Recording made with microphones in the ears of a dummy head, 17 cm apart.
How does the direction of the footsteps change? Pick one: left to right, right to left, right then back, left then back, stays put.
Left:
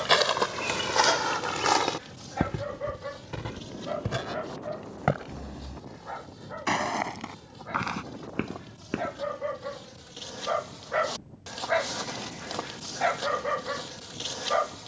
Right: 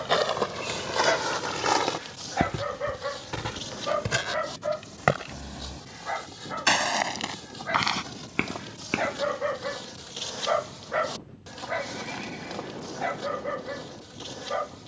left to right.